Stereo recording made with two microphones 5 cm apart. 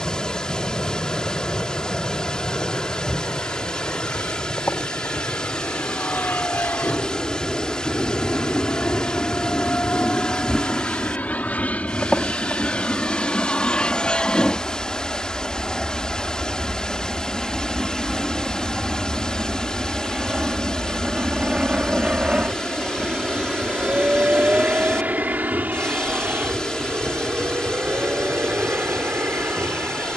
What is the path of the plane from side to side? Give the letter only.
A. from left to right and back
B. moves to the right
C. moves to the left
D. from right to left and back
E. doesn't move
B.